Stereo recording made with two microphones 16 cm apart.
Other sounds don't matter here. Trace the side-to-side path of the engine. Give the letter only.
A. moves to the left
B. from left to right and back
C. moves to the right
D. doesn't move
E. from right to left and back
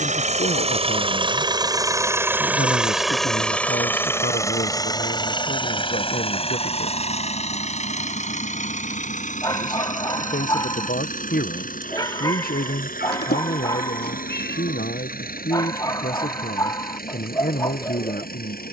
A.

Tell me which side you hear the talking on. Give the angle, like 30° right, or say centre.
60° left.